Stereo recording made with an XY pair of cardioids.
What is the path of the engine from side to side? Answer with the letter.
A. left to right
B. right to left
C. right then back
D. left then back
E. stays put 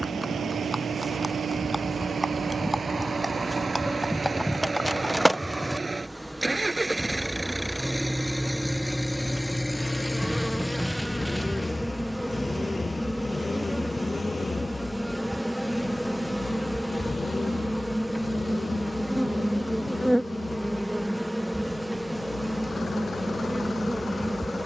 B.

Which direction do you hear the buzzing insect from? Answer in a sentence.
In this clip you hear the buzzing insect in the centre.